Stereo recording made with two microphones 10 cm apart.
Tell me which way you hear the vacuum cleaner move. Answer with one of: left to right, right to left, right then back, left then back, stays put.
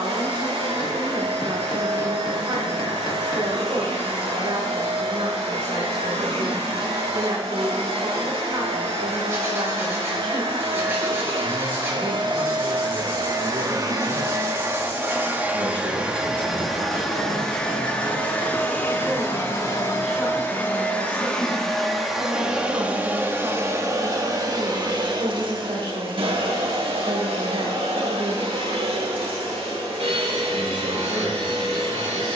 left then back.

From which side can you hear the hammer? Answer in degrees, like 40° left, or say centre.
40° left.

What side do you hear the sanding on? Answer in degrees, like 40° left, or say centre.
20° right.